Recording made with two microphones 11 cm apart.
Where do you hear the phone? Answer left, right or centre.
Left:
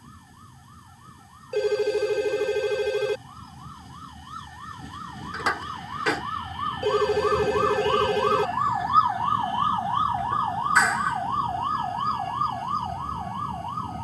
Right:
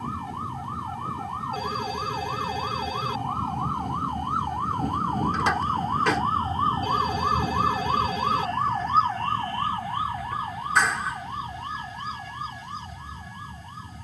left.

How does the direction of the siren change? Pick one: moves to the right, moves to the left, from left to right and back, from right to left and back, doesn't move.
moves to the left.